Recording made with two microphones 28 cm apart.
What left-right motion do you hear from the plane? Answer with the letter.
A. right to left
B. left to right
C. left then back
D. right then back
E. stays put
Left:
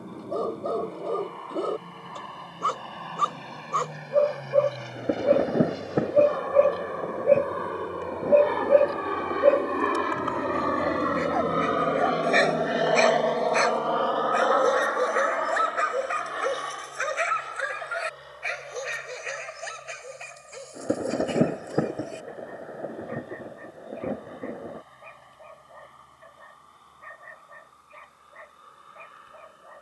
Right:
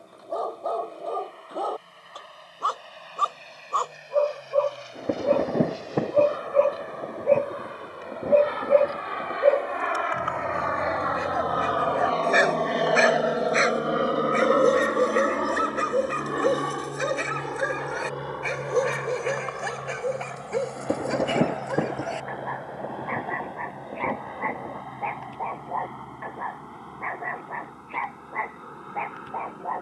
B.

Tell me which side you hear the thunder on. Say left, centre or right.
centre.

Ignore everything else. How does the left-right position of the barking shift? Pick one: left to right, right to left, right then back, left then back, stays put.
left to right.